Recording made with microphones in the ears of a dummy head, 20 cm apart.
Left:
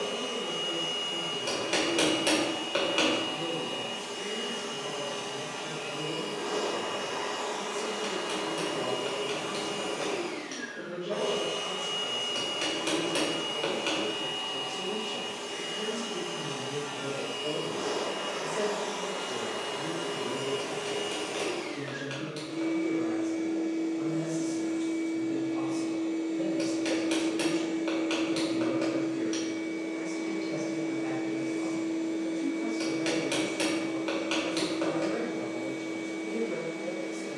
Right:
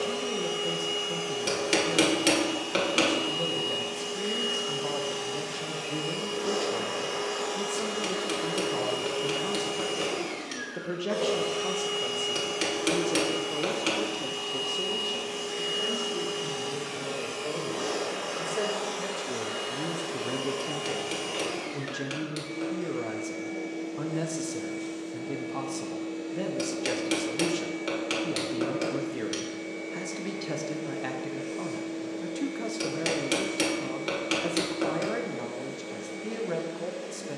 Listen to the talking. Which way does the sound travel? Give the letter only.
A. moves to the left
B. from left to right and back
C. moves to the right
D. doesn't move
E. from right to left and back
E.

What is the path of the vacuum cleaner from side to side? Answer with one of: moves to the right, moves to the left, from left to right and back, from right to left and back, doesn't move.
moves to the left.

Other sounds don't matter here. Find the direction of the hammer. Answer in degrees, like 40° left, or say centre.
30° right.